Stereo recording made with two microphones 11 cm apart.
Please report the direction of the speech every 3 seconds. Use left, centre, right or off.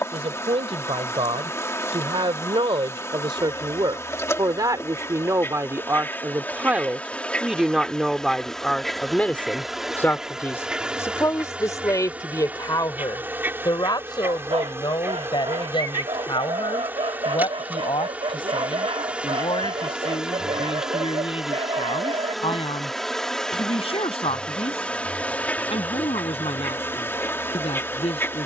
right, right, centre, left, left, left, left, left, left, left.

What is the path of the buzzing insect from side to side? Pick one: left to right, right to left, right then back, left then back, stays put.
right then back.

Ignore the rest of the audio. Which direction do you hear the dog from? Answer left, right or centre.
right.